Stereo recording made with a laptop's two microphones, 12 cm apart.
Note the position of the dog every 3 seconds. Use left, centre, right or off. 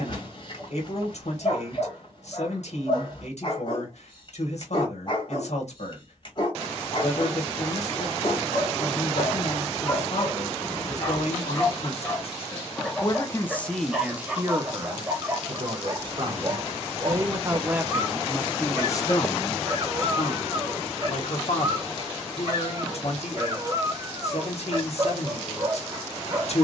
left, left, left, left, centre, right, right, right, right.